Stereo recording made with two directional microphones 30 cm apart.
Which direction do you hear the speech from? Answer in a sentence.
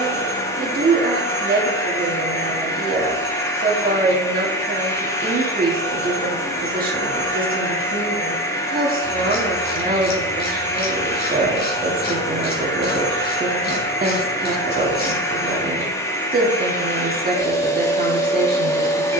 You can hear the speech on the right.